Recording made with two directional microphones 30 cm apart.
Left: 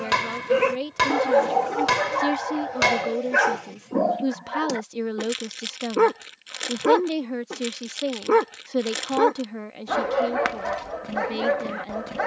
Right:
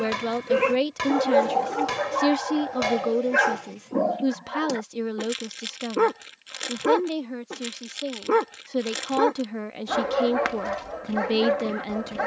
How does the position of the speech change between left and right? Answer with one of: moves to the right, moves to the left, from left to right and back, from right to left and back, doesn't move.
from right to left and back.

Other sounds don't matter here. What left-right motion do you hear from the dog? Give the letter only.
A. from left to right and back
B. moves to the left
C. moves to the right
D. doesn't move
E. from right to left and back
D.